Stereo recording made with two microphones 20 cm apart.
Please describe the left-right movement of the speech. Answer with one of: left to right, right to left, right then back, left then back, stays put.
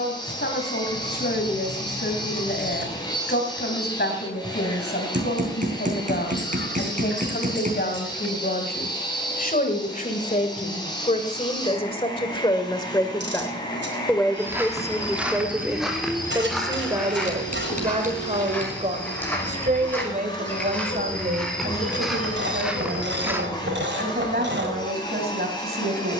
left to right.